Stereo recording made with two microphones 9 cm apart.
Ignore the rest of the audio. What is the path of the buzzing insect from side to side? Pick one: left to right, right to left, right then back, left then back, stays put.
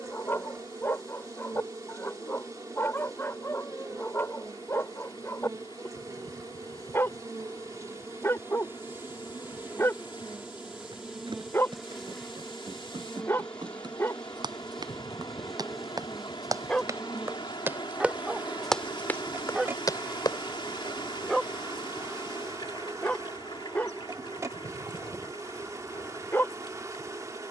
left then back.